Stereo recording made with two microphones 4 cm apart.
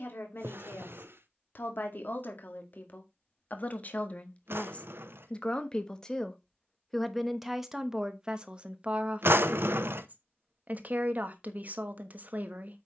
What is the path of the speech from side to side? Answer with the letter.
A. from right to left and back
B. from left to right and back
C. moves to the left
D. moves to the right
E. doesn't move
D.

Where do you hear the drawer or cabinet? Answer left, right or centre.
right.